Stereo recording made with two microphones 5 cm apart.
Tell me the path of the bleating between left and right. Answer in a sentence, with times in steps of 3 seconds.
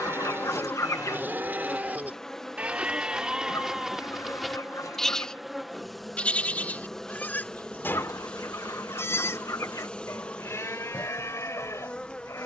You can hear the bleating on the right from 0 s, in the centre from 3 s and on the left from 6 s.